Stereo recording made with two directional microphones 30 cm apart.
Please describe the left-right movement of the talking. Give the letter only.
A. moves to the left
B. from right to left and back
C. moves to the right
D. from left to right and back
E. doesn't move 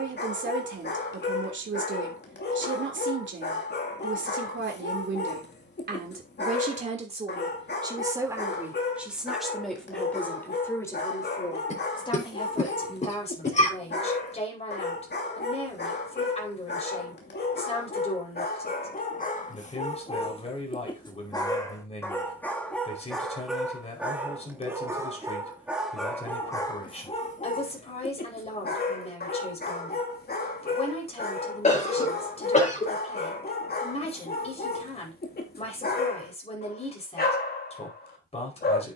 A.